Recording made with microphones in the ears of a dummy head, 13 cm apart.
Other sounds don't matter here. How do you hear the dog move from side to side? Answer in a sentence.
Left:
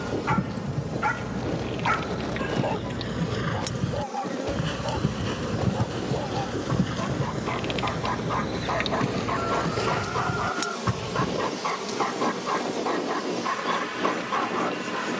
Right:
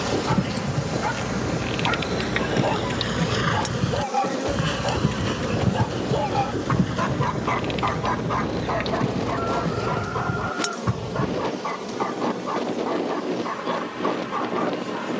In this clip you hear the dog go right and come back.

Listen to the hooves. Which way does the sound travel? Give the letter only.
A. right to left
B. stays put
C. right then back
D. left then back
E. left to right
A.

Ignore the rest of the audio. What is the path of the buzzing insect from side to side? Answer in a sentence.
In this clip you hear the buzzing insect go from the right side to the left.